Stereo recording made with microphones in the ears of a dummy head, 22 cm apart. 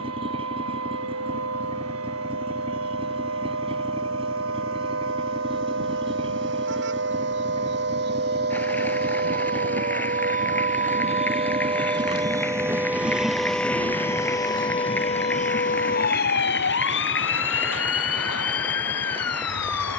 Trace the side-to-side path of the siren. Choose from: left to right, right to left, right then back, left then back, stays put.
right to left.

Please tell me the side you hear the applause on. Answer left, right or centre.
centre.